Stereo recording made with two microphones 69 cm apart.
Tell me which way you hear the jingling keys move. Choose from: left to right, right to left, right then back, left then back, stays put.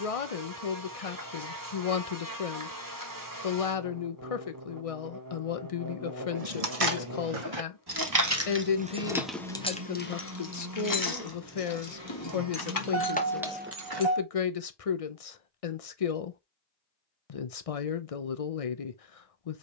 left then back.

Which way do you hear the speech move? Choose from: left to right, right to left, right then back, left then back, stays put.
stays put.